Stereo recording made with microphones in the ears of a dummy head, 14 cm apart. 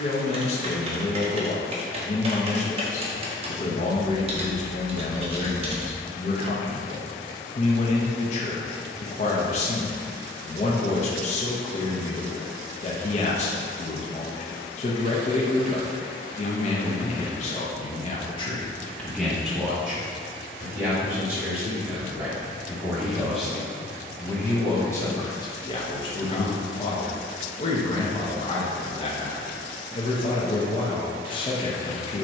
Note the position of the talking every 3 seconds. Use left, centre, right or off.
left, left, left, left, left, left, centre, centre, left, left, left.